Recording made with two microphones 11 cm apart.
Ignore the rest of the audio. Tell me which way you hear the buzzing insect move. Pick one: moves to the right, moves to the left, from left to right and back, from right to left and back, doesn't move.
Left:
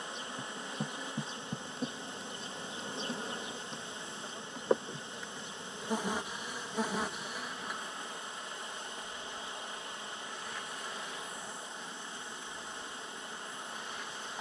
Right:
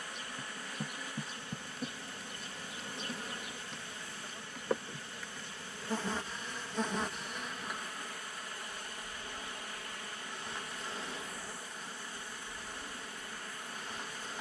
moves to the right.